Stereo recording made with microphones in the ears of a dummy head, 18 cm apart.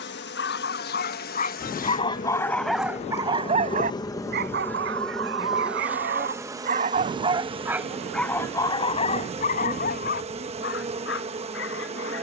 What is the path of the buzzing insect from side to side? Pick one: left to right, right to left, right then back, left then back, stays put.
left to right.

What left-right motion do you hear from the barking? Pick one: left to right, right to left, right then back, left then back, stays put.
right then back.